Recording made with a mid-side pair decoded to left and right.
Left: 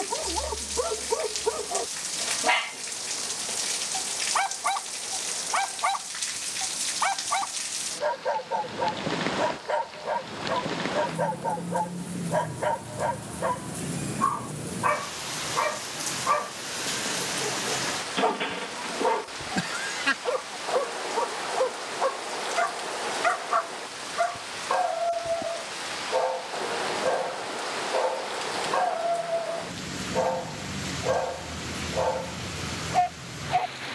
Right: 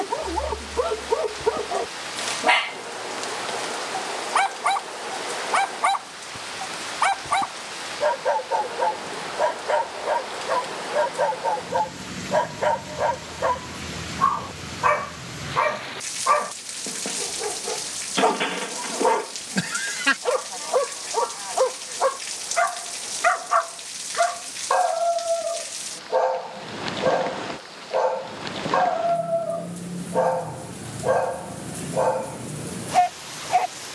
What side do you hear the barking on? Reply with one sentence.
You can hear the barking on the right.